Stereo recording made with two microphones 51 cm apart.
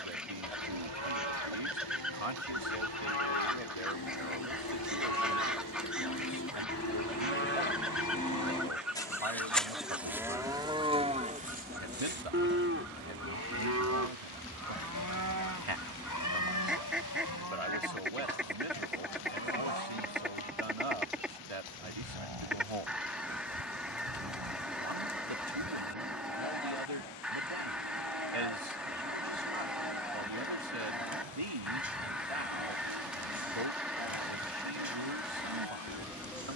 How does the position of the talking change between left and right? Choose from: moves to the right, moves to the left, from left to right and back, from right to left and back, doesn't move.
doesn't move.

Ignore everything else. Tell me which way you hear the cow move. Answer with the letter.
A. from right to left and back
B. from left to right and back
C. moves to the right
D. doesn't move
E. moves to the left
C.